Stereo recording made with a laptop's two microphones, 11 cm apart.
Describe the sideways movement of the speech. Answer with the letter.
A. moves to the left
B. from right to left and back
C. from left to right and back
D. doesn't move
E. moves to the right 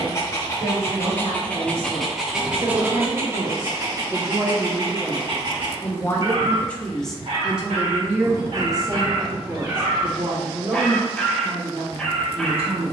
B.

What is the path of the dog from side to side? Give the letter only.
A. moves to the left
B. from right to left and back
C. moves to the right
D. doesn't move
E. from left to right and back
E.